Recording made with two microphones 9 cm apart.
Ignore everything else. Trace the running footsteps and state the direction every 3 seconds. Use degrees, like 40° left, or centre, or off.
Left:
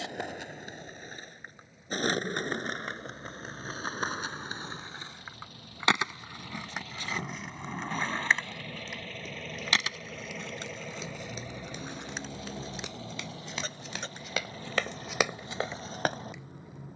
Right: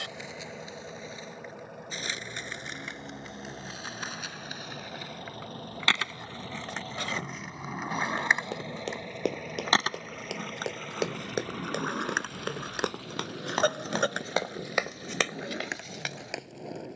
off, off, 80° right, 70° right, 50° right, 30° left.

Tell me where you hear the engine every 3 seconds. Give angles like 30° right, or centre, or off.
70° right, 60° right, 30° right, centre, 30° left, 50° left.